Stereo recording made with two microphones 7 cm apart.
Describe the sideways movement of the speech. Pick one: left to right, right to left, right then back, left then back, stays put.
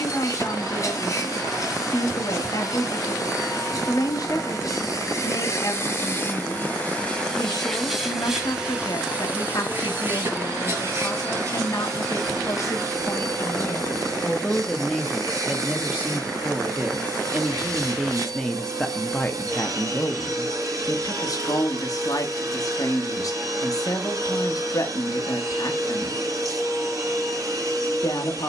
right then back.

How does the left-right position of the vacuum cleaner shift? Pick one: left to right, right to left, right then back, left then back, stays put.
left to right.